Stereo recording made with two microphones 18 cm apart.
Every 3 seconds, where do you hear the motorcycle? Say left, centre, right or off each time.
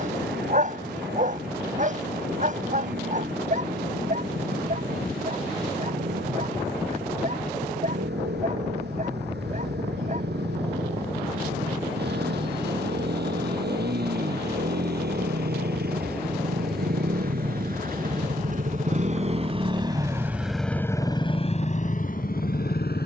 right, right, right, right, right, right, right, left.